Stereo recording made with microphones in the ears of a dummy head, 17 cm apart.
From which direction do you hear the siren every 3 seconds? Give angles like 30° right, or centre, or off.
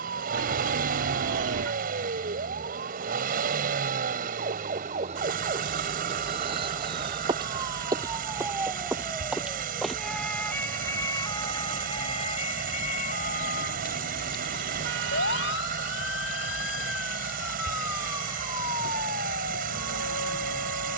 50° right, 40° right, 20° right, 10° left, 40° left, 70° left, 80° left.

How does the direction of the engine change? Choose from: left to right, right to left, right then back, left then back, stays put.
stays put.